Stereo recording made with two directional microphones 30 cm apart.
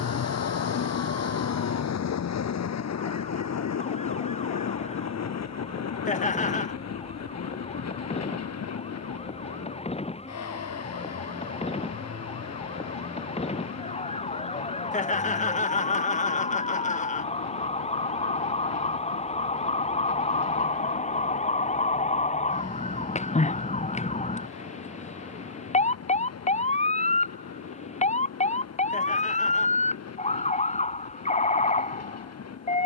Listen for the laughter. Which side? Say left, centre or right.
left.